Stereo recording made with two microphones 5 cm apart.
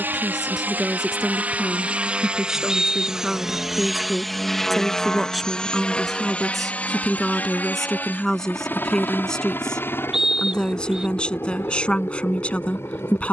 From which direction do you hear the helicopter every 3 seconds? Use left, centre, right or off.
right, centre, left, left, left.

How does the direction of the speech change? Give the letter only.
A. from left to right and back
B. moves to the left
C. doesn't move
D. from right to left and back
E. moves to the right
B.